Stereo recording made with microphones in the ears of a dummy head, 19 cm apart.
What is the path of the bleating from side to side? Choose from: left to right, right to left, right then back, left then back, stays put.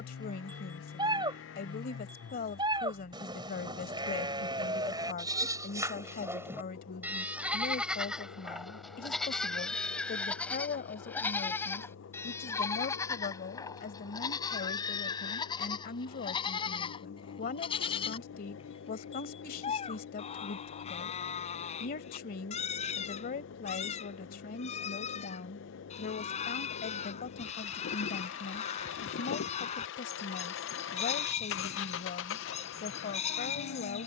right to left.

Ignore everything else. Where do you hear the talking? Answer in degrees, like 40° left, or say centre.
40° left.